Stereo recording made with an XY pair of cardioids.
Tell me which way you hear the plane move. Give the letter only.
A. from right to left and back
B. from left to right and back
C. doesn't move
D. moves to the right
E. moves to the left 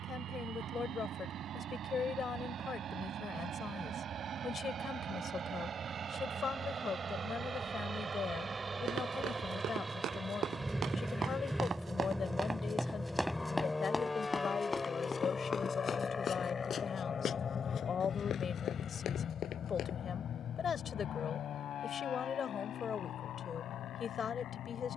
E.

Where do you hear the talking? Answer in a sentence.
You can hear the talking on the left.